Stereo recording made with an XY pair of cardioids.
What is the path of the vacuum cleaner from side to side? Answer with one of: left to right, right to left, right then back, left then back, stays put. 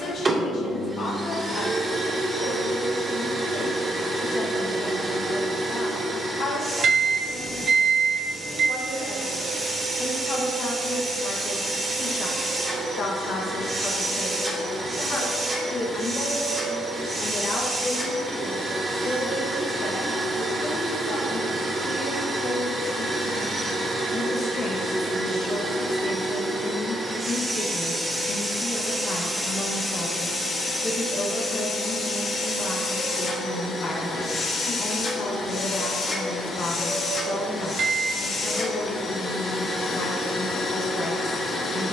right to left.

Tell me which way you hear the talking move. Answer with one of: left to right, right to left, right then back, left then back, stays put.
stays put.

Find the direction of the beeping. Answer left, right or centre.
right.